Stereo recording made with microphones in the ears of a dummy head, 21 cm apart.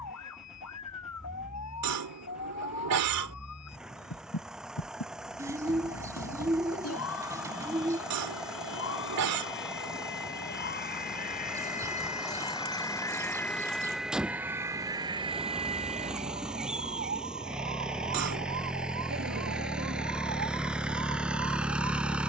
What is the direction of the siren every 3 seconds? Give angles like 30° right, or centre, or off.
80° left, 70° left, 60° left, 40° left, 10° left, 30° right, 50° right, 60° right.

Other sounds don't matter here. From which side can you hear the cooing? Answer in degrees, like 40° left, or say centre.
10° right.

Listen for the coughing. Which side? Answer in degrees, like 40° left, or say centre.
70° right.